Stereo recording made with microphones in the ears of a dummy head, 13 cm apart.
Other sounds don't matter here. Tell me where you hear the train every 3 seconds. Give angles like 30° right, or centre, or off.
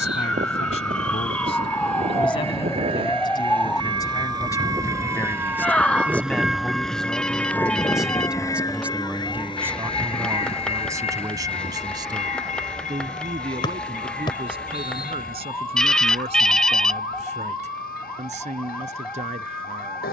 50° right, 30° right, 10° left, 40° left, 60° left, 70° left, 70° left.